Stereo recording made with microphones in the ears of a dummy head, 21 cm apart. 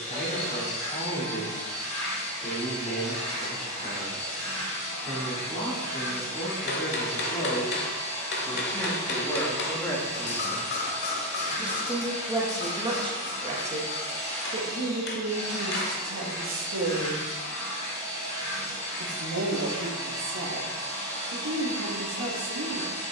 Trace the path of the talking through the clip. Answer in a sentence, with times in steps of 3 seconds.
In this clip you hear the talking on the left from 0 s, in the centre from 9 s and on the right from 12 s.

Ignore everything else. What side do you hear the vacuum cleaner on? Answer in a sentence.
You can hear the vacuum cleaner on the left.